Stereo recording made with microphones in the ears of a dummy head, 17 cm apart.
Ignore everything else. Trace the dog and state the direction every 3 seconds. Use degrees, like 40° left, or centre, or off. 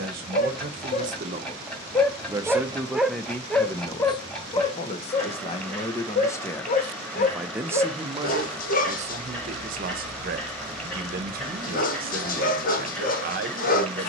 20° left, 20° left, 50° left, 50° left, 50° left.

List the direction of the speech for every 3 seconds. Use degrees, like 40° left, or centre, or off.
40° right, 20° left, 10° right, 50° right, 50° right.